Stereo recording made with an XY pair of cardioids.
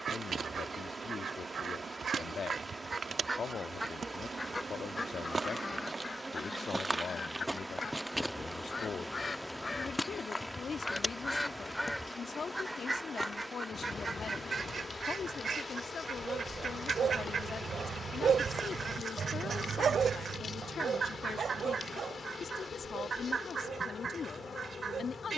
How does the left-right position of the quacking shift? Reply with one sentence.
In this clip you hear the quacking go left and come back.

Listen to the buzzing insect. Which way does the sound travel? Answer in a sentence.
In this clip you hear the buzzing insect move to the left.